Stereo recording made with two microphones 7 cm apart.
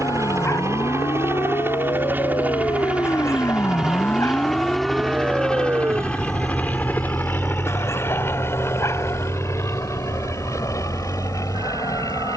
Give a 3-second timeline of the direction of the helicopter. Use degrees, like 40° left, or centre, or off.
30° right, centre, 30° left, 40° left.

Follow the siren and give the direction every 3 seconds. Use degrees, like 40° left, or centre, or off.
70° left, 10° left, 60° right, 70° right.